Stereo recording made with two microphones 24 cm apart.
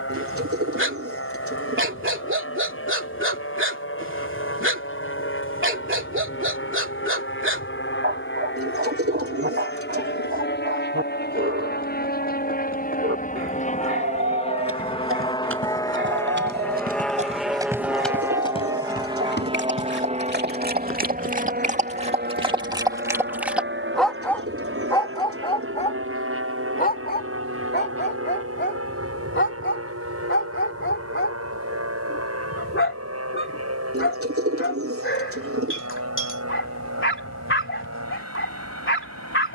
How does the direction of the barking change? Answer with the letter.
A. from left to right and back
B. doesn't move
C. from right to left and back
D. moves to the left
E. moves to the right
D.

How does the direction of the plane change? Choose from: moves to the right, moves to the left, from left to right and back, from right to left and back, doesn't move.
moves to the right.